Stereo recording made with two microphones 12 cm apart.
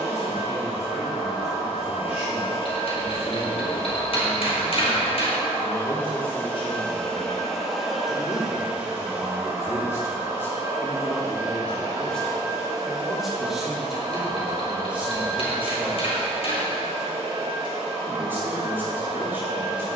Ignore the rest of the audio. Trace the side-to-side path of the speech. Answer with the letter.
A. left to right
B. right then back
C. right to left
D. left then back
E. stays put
A.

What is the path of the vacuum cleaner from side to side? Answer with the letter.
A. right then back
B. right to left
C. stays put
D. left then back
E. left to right
E.